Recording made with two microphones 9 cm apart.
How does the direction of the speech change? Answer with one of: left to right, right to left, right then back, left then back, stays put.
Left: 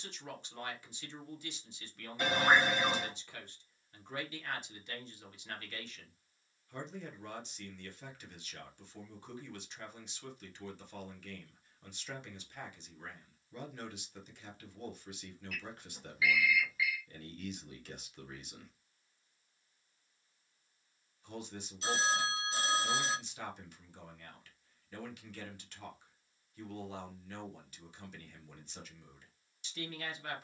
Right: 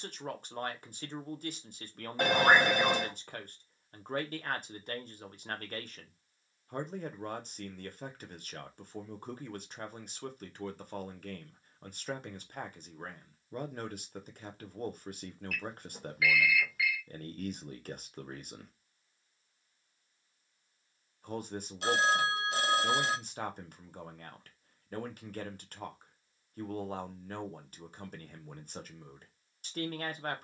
stays put.